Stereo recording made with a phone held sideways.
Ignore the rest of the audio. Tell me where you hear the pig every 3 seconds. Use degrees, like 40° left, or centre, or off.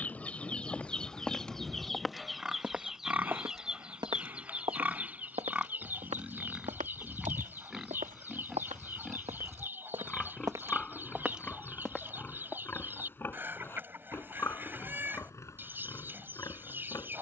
centre, 10° right, centre, 10° left, 20° left, 20° left.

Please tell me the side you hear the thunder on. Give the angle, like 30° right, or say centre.
10° right.